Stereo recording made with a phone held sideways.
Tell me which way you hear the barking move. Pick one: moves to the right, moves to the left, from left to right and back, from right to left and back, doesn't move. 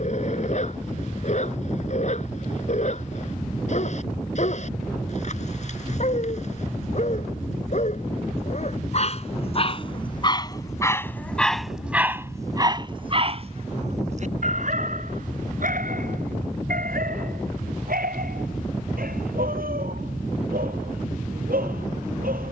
moves to the right.